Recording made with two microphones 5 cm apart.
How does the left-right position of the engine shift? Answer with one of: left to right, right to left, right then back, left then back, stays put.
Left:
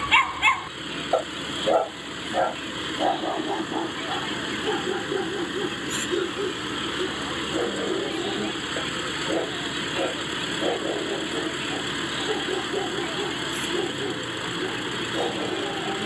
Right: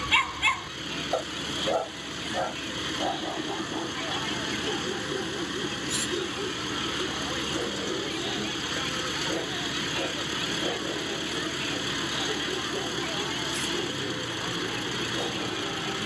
stays put.